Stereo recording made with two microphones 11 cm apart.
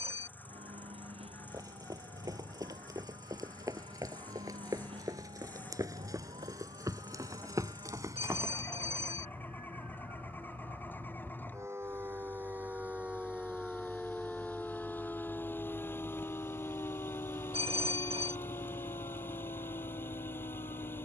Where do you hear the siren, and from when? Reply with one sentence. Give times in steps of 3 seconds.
In this clip you hear the siren on the right from 0 s, in the centre from 12 s and on the left from 15 s.